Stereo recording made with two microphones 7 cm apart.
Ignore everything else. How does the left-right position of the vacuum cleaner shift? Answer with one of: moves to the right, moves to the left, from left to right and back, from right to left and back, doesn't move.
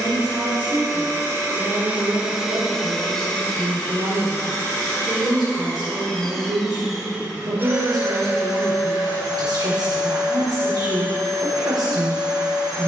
from right to left and back.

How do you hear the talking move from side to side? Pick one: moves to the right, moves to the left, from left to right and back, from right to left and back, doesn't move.
doesn't move.